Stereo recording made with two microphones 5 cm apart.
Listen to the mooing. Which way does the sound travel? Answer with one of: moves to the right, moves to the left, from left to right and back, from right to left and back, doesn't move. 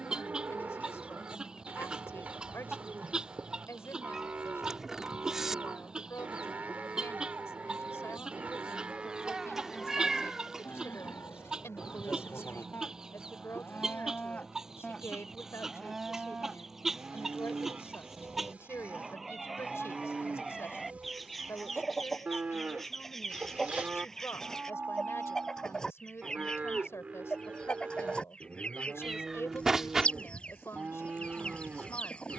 from right to left and back.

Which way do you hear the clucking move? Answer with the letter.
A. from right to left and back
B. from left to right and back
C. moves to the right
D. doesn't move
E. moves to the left
E.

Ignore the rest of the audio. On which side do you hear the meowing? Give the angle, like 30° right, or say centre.
10° right.